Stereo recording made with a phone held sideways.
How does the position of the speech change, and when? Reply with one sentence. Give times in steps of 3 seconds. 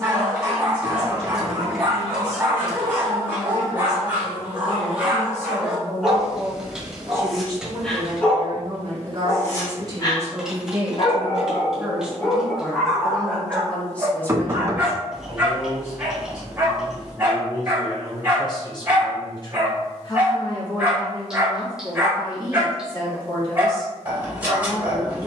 You can hear the speech on the left from 0 s, on the right from 6 s, in the centre from 12 s and on the left from 15 s.